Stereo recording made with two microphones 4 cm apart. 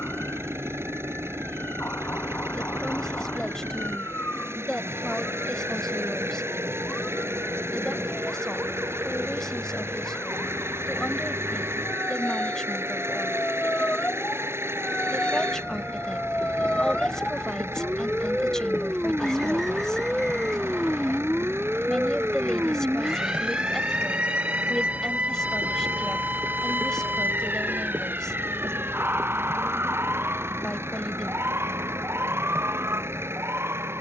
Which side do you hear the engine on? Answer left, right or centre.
right.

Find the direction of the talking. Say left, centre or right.
centre.